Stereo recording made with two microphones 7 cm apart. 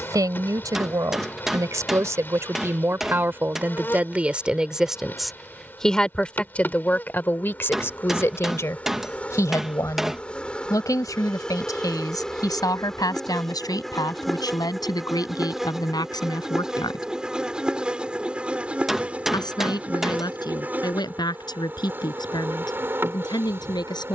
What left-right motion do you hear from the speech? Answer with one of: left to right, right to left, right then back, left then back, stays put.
right to left.